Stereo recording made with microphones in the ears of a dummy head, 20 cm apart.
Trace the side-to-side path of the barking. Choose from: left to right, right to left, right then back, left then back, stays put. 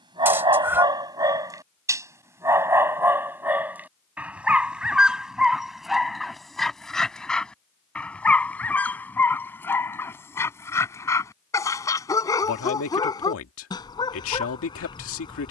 right to left.